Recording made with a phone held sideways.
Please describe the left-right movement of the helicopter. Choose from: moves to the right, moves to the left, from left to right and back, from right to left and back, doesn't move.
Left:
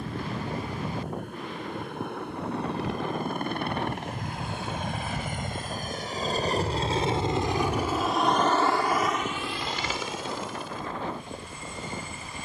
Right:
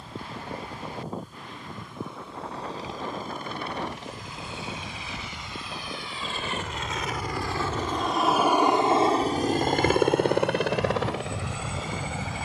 moves to the right.